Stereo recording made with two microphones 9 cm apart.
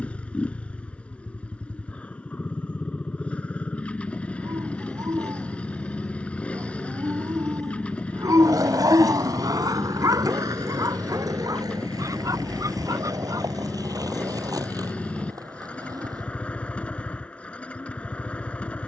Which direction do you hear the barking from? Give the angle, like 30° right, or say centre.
40° right.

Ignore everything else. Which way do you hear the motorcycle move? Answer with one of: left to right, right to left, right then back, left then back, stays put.
stays put.